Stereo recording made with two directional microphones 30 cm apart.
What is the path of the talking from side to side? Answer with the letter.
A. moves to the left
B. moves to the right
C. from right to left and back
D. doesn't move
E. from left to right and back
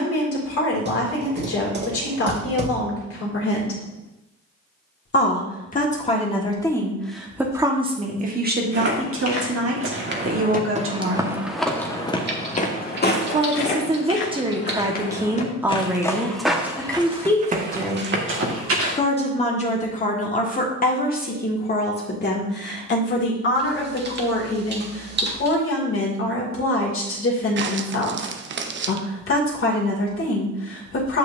E.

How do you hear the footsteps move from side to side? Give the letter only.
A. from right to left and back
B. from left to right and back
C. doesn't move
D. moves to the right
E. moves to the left
A.